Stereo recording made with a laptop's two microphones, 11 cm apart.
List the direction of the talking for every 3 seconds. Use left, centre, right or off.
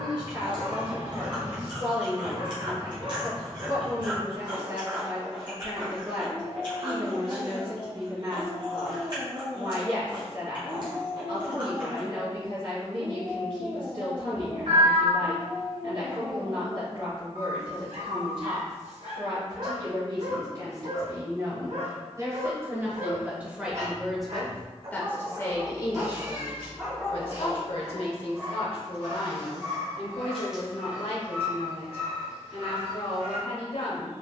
right, right, right, right, right, right, right, right, left, left, left, left.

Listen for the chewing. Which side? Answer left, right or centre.
right.